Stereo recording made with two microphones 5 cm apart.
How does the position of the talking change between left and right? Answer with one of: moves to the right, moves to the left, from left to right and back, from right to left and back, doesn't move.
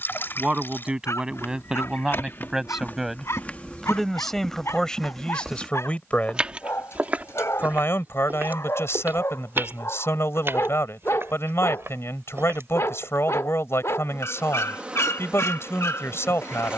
moves to the left.